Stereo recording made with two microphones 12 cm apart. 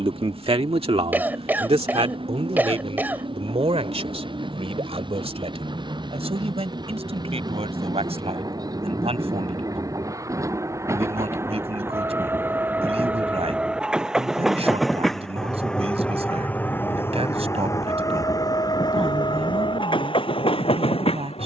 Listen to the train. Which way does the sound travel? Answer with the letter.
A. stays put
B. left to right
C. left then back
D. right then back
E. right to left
E.